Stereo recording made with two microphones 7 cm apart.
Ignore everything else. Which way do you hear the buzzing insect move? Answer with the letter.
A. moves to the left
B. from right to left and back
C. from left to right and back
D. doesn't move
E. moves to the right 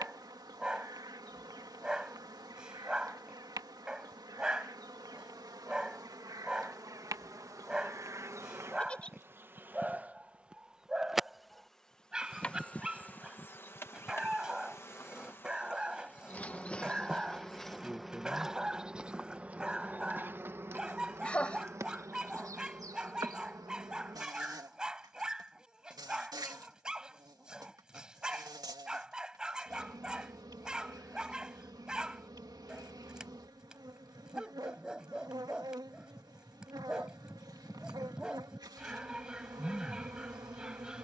B.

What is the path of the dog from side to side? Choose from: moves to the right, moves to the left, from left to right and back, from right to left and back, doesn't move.
doesn't move.